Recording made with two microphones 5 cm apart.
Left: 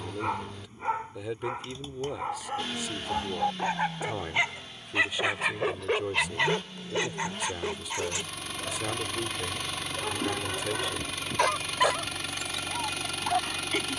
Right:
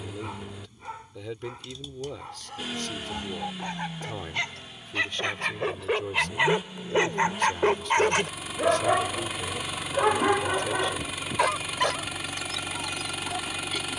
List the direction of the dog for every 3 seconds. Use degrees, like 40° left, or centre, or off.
30° left, 10° left, 40° right, 40° right, 30° left.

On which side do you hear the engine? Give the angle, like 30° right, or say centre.
10° right.